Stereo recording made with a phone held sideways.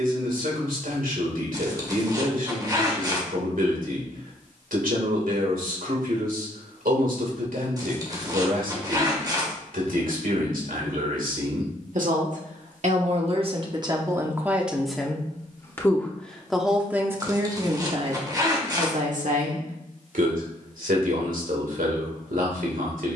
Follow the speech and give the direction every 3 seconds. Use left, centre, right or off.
right, right, right, right, right, centre, right, right.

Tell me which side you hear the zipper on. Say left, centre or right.
right.